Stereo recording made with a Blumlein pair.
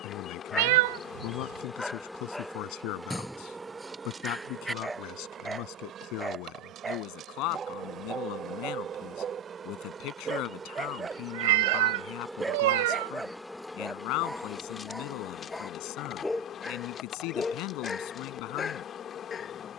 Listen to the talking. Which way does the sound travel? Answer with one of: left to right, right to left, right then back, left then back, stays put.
stays put.